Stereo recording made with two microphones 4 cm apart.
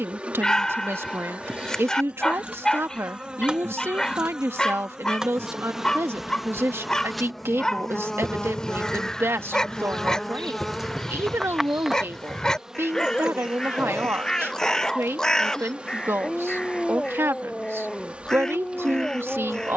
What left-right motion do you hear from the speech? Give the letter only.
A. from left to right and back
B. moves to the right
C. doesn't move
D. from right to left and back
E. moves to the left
C.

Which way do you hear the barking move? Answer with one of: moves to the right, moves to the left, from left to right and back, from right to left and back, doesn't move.
doesn't move.